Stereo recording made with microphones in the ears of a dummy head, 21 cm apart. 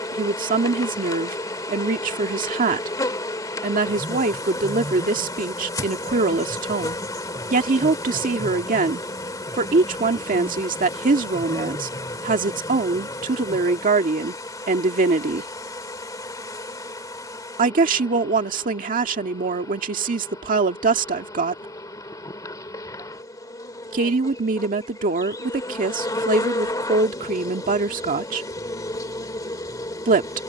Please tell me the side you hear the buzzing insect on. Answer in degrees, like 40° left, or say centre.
20° left.